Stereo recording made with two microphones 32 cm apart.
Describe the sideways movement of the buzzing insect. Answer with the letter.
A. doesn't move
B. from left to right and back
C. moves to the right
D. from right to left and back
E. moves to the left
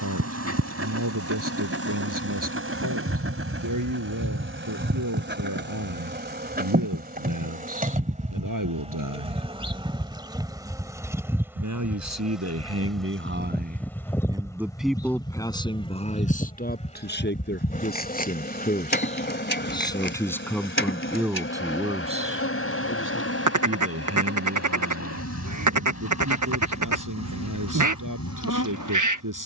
E.